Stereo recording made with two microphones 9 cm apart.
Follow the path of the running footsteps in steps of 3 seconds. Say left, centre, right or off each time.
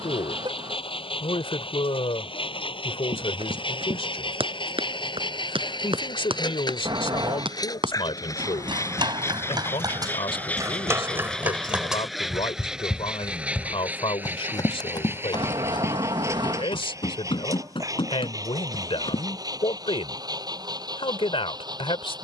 off, right, right, right, left, left, left, off.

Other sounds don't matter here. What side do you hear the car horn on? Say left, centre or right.
right.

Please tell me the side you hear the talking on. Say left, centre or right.
left.